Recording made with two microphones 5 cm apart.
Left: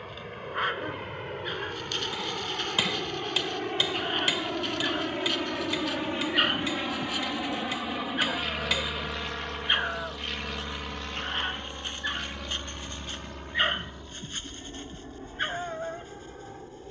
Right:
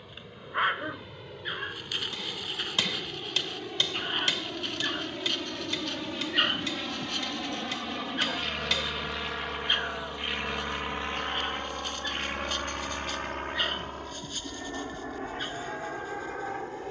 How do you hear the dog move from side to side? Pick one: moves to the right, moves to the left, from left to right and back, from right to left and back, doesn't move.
moves to the left.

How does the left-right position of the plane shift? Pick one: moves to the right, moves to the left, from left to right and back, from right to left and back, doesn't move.
moves to the right.